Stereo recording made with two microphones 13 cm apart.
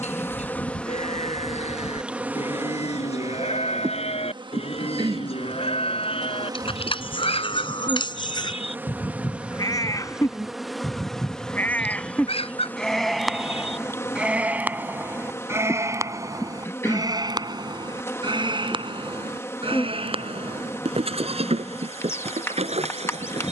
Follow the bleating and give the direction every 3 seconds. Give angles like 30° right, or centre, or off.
60° left, 50° left, 40° left, 20° left, centre, 30° right, 50° right, 60° right.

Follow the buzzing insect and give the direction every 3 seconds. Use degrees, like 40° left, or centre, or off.
centre, 30° right, 20° right, centre, 20° left, 20° left, 20° left, 20° left.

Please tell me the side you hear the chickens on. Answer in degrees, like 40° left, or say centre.
50° left.